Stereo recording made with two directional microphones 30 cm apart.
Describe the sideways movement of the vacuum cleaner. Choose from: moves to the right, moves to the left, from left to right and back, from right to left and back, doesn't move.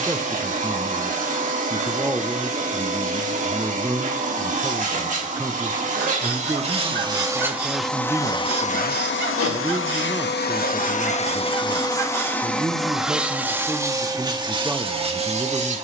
from right to left and back.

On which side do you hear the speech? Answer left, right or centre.
centre.